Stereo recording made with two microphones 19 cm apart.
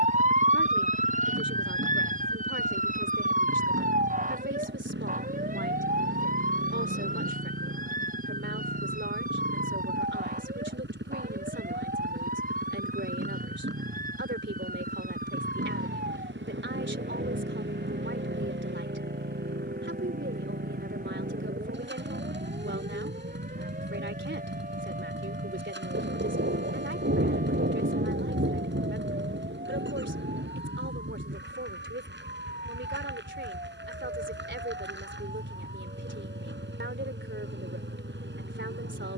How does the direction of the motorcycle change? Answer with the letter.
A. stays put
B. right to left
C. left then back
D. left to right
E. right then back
A.